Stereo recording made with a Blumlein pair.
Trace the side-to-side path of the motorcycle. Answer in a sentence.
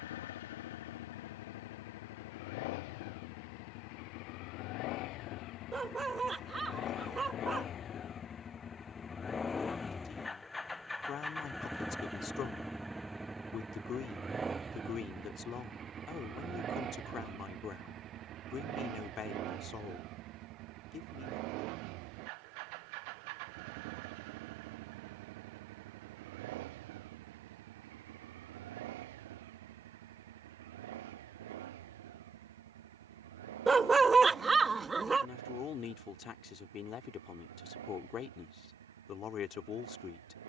In this clip you hear the motorcycle travel towards the right.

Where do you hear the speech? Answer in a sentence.
You can hear the speech on the left.